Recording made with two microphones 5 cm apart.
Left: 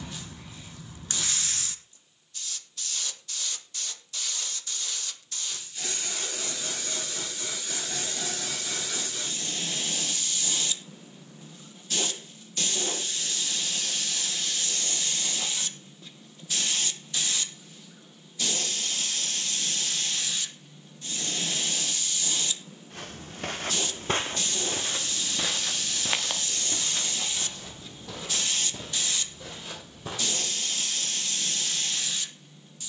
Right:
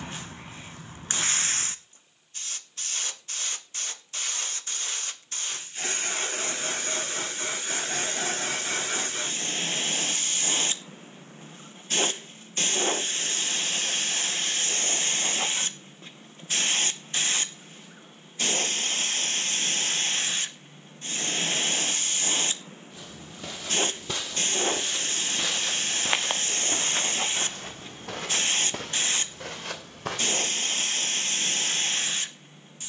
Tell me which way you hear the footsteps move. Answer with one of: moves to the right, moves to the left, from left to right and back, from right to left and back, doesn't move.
moves to the right.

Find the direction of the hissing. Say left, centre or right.
right.